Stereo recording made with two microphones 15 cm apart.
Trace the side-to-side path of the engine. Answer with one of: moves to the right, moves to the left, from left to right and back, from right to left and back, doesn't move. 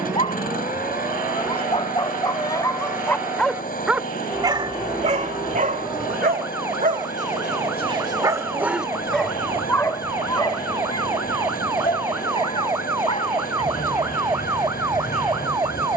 doesn't move.